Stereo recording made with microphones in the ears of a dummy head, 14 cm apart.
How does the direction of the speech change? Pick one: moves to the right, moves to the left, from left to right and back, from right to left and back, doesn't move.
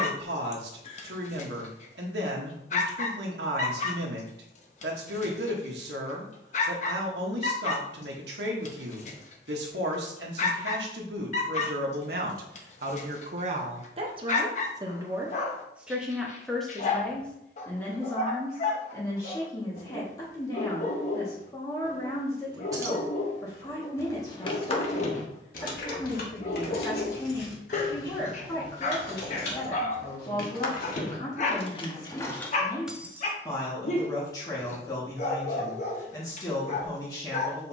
moves to the left.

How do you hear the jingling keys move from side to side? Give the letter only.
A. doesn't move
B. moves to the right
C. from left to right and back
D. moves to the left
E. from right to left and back
E.